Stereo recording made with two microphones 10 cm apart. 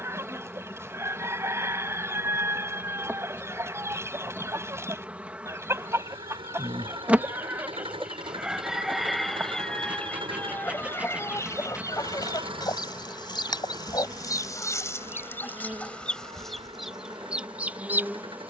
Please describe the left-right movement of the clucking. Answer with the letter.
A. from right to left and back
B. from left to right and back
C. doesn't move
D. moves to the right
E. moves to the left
A.